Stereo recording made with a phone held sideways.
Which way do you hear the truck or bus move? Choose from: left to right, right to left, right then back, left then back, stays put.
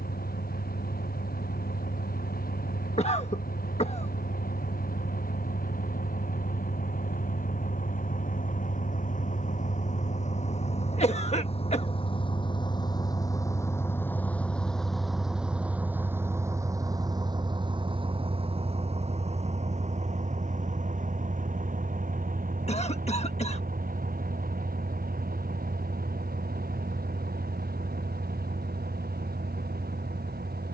left to right.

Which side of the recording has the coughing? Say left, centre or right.
left.